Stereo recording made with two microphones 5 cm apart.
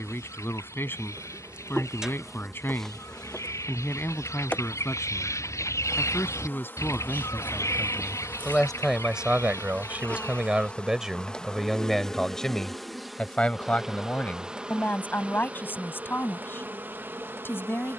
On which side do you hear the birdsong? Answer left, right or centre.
left.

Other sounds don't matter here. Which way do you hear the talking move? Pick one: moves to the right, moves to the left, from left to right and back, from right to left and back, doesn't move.
from left to right and back.